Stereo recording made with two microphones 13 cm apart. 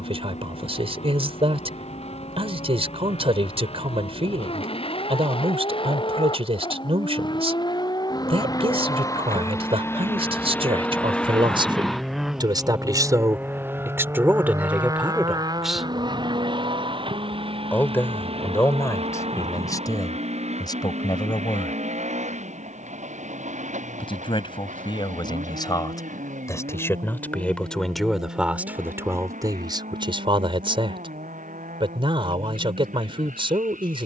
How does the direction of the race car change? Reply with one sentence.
You can hear the race car move to the right.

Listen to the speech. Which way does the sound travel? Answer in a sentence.
You can hear the speech move from right to left and back again.